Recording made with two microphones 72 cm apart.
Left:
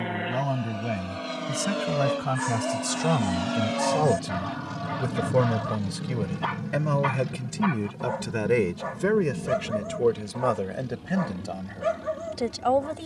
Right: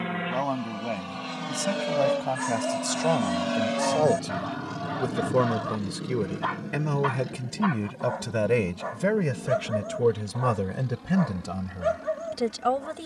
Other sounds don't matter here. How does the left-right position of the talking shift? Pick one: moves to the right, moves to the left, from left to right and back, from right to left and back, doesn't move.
moves to the right.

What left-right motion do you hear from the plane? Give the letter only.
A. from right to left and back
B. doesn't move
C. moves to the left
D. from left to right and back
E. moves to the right
C.